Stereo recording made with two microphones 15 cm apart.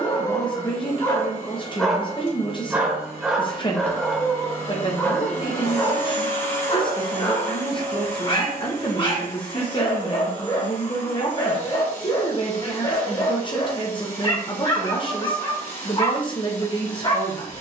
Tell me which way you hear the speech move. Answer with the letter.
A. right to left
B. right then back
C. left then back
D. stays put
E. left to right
D.